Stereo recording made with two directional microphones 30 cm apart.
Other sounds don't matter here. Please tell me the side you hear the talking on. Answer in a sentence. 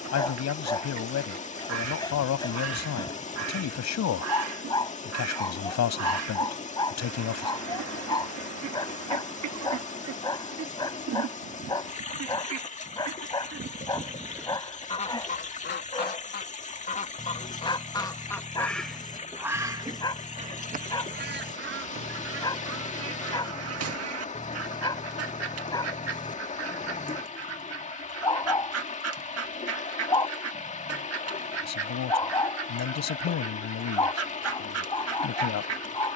You can hear the talking on the left.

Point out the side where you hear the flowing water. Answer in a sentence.
You can hear the flowing water on the left.